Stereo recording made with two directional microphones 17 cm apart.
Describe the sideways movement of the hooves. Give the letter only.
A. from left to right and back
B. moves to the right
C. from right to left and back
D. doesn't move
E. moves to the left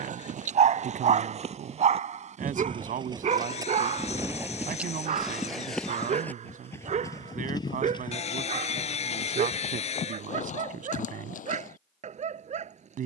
E.